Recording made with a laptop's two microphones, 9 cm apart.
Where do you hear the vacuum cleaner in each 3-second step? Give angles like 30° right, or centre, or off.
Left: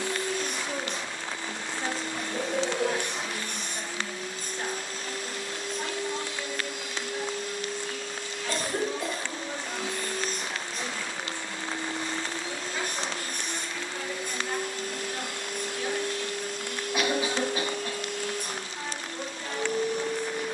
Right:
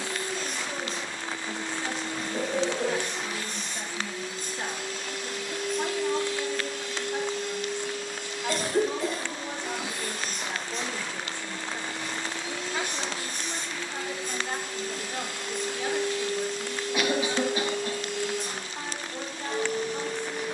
60° left, 40° left, centre, centre, 50° left, 50° left, 50° left.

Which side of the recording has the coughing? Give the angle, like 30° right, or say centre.
20° left.